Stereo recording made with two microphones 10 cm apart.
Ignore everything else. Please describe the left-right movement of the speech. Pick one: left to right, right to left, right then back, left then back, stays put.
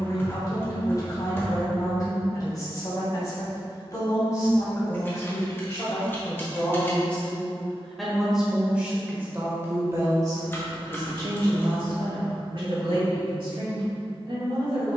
left to right.